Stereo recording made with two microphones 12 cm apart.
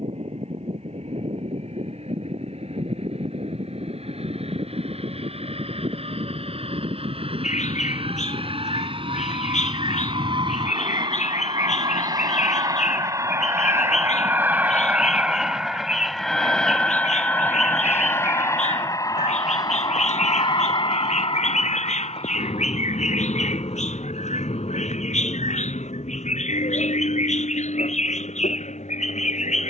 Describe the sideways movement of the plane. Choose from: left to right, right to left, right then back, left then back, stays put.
right to left.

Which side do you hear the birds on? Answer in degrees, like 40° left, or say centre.
80° left.